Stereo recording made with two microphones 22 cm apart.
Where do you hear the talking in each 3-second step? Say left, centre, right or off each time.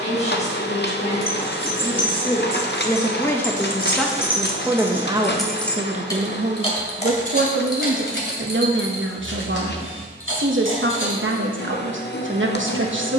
left, centre, right, right, right.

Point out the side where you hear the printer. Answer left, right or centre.
left.